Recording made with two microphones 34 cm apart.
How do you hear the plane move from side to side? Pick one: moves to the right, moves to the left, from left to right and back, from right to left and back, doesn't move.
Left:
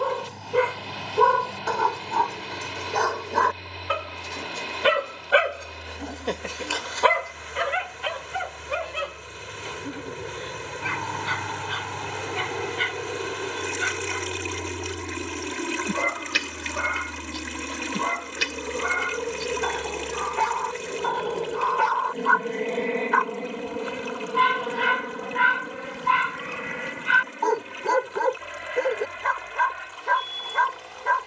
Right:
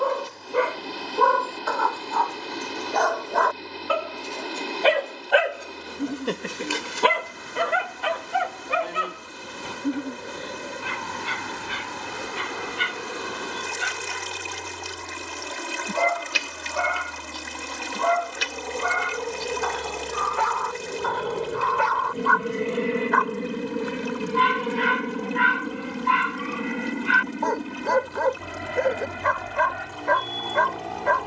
moves to the right.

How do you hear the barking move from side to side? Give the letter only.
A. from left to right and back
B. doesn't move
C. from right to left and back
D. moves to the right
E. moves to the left
A.